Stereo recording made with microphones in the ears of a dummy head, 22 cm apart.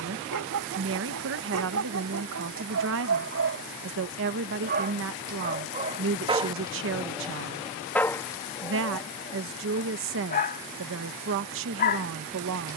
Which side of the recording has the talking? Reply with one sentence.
In this clip you hear the talking on the right.